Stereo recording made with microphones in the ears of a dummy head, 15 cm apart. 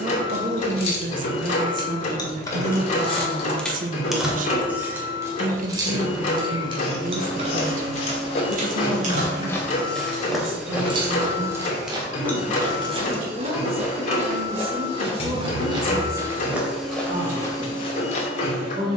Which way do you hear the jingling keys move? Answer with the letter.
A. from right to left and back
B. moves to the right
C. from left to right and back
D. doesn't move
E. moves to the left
C.